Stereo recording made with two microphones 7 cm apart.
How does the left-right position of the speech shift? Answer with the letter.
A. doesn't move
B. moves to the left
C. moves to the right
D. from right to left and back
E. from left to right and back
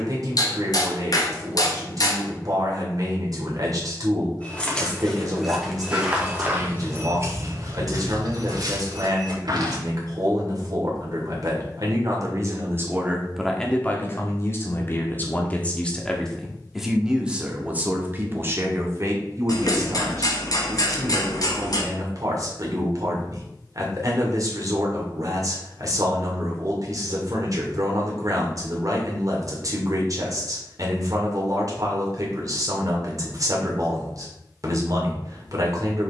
D.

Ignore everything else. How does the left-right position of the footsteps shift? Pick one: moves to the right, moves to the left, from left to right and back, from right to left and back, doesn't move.
moves to the right.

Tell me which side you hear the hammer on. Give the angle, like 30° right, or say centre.
60° left.